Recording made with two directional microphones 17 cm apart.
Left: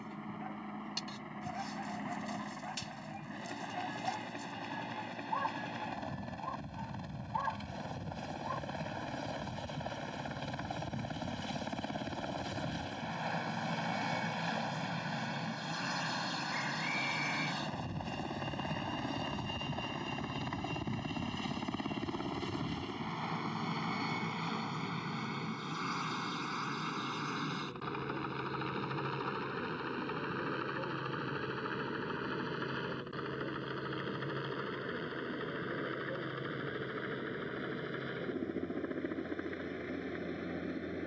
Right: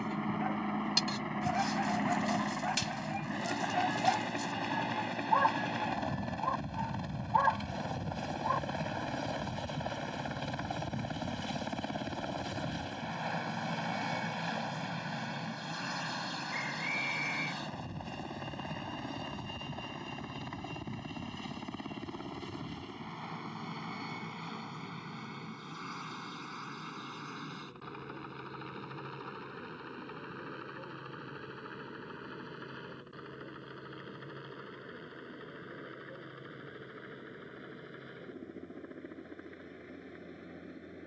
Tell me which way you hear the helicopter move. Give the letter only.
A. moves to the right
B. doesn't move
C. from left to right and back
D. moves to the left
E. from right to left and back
D.